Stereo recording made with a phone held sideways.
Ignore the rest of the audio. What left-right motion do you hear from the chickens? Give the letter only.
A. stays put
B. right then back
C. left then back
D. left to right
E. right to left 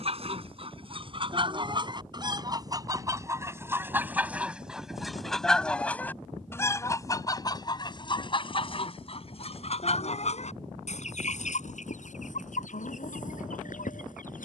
E.